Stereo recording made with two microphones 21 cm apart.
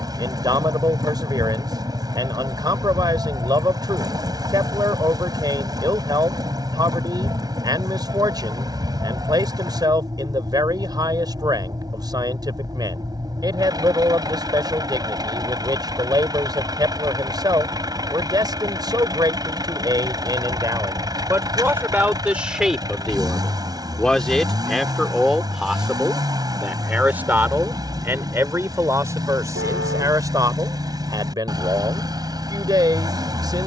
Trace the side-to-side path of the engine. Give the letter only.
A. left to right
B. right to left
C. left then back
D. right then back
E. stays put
E.